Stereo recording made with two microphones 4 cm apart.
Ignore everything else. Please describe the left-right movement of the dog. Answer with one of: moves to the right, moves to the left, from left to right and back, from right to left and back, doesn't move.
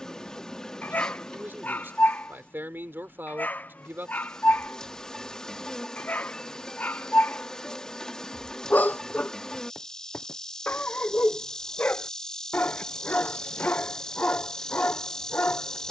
doesn't move.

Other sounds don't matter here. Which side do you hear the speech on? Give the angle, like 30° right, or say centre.
60° right.